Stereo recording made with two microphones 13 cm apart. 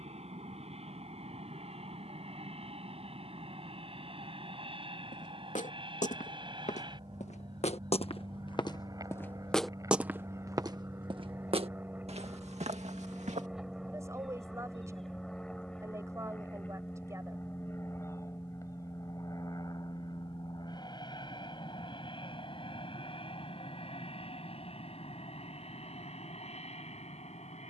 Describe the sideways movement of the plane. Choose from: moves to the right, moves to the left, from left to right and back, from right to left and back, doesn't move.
moves to the left.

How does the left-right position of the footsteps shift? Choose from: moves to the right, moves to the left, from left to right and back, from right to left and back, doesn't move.
moves to the right.